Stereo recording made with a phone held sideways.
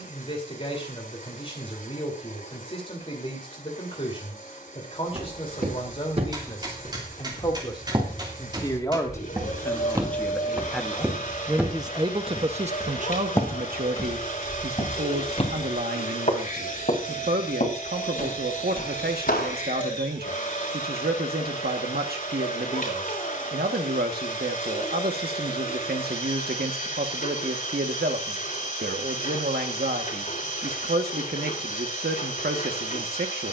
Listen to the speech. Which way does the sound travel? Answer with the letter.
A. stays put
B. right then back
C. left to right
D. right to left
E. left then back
C.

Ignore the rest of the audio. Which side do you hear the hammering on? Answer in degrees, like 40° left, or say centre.
30° right.